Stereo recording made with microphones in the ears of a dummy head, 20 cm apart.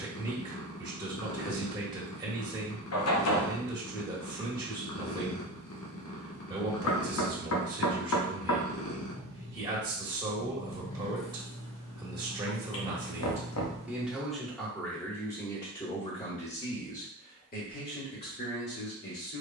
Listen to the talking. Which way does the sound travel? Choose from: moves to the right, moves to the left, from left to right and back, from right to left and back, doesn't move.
moves to the left.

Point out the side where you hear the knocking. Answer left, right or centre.
left.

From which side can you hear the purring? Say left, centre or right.
left.